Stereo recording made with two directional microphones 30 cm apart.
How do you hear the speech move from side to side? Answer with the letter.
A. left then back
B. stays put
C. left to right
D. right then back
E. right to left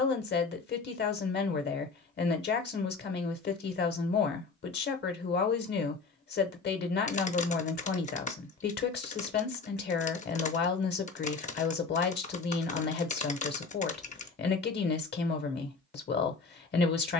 B.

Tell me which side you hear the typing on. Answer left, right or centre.
left.